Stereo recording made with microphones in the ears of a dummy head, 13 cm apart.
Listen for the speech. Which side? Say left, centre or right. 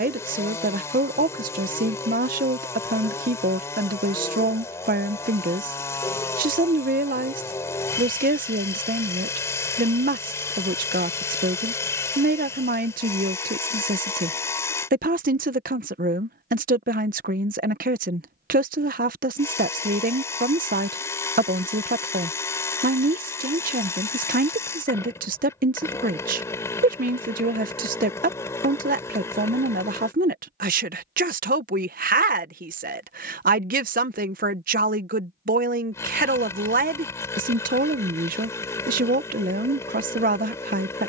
right.